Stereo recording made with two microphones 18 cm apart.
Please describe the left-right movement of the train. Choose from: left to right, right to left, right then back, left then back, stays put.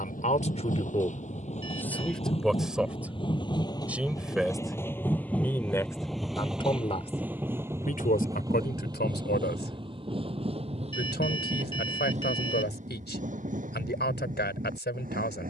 left to right.